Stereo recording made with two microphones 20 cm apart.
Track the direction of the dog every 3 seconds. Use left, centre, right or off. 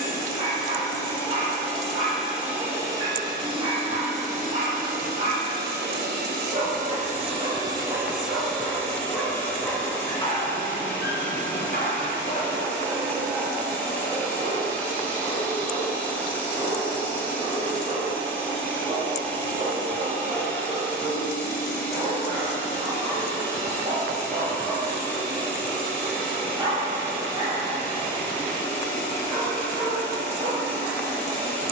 right, right, right, left, centre, right, right, right, right, right, right.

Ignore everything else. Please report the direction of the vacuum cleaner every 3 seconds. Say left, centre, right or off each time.
centre, right, right, centre, centre, centre, centre, centre, centre, centre, centre.